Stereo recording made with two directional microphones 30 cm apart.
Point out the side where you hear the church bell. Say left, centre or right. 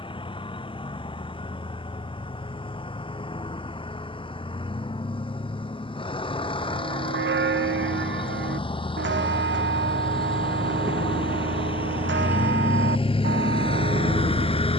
right.